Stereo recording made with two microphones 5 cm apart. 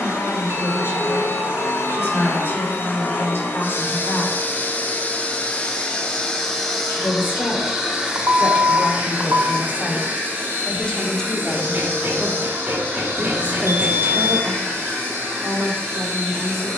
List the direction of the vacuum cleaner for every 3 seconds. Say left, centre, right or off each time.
left, left, centre, right, right, right.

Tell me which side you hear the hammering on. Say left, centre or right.
right.